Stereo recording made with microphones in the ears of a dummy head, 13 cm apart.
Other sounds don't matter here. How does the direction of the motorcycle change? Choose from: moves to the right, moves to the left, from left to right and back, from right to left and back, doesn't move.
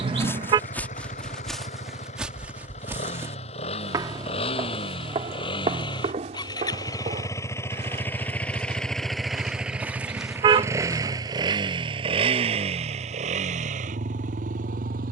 moves to the right.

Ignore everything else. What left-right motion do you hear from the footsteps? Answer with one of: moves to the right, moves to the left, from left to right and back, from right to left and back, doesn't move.
from left to right and back.